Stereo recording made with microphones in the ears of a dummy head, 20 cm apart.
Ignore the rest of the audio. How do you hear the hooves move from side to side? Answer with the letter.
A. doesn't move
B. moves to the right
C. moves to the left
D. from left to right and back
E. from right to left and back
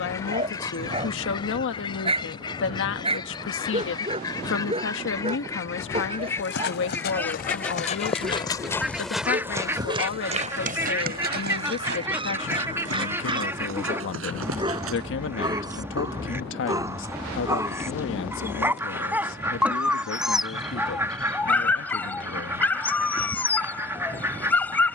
B.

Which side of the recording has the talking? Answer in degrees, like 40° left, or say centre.
60° left.